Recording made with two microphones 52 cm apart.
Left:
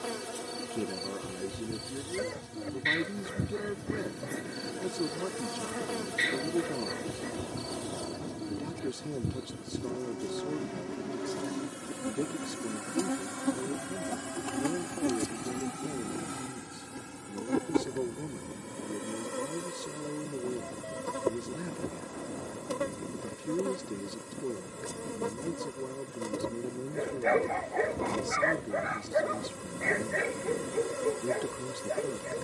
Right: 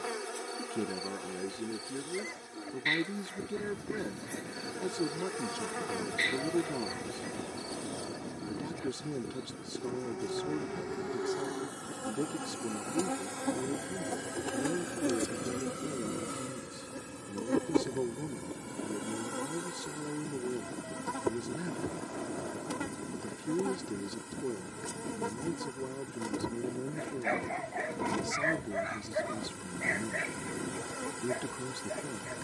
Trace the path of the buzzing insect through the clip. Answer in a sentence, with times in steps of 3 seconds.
In this clip you hear the buzzing insect on the left from 0 s and in the centre from 15 s.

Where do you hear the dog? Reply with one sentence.
You can hear the dog on the left.